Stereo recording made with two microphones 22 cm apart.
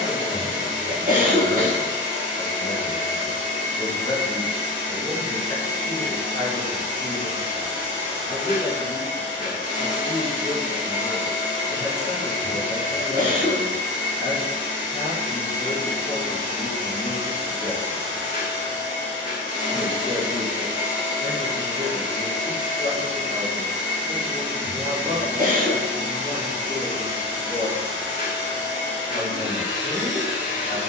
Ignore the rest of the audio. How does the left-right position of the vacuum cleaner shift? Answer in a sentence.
You can hear the vacuum cleaner stay put.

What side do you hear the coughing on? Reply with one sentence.
You can hear the coughing on the right.